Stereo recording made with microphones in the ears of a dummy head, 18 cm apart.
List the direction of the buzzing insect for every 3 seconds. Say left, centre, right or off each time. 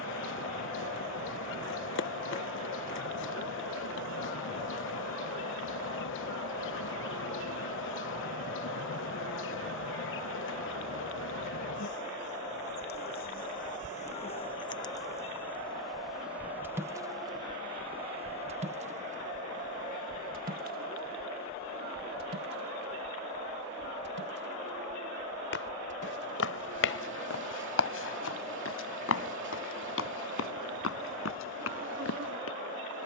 left, left, left, left, left, centre, right, right, right, right, right.